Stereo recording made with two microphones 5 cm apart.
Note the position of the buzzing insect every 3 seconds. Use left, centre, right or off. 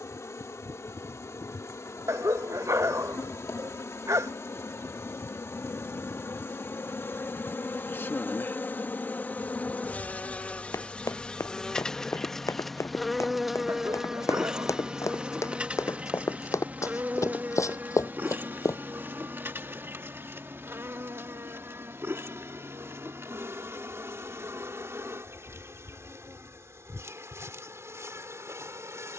left, left, left, left, centre, right, right, right, right, right.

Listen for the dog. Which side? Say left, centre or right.
right.